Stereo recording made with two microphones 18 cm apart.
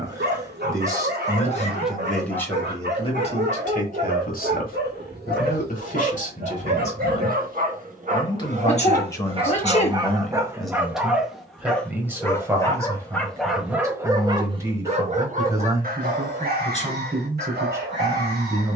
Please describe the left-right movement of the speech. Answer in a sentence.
You can hear the speech move from right to left and back again.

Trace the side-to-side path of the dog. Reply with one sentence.
In this clip you hear the dog go left and come back.